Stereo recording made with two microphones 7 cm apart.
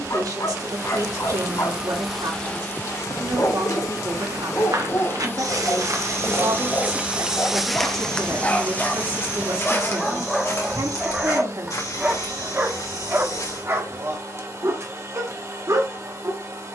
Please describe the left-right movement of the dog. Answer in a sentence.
In this clip you hear the dog go from the left side to the right.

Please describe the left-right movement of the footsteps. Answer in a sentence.
In this clip you hear the footsteps travel towards the left.